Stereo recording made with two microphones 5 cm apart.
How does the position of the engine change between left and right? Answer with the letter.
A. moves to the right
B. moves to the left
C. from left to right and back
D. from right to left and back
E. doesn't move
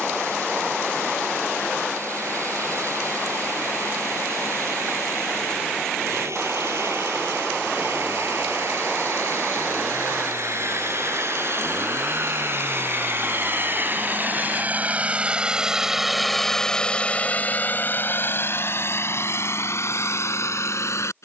B.